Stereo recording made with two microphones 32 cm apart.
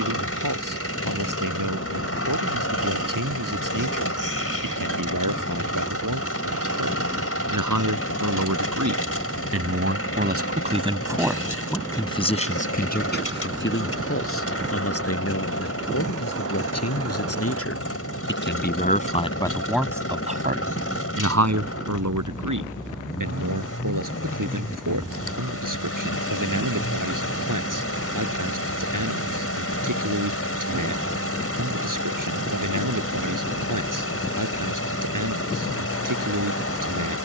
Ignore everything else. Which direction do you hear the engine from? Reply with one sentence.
In this clip you hear the engine on the left.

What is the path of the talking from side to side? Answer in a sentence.
You can hear the talking move from right to left and back again.